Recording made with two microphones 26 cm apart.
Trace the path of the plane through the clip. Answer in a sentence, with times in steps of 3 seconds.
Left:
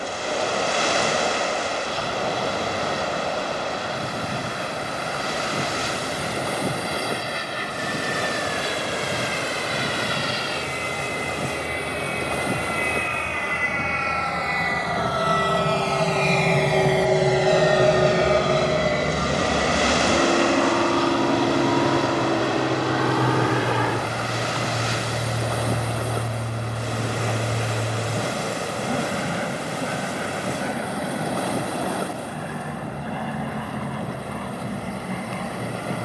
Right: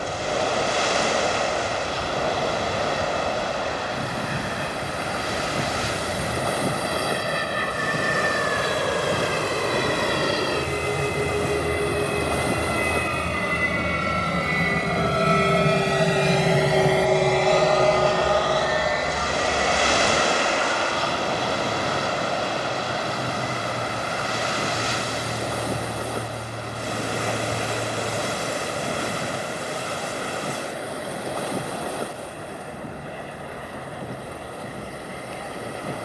In this clip you hear the plane on the right from 0 s, in the centre from 15 s and on the left from 18 s.